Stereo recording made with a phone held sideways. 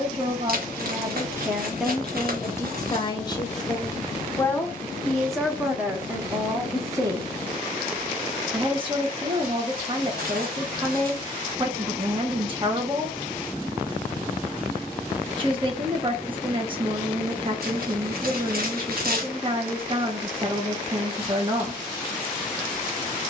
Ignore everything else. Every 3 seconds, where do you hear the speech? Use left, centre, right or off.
centre, centre, right, right, right, right, right, right.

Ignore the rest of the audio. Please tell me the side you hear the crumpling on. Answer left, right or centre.
right.